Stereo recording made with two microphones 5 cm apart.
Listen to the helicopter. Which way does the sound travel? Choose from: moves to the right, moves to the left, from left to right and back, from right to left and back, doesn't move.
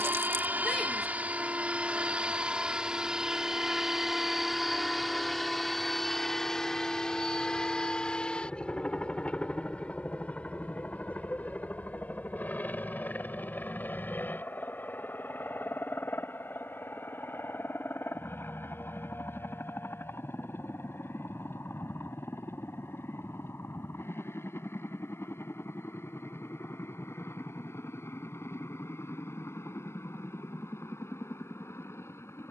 moves to the left.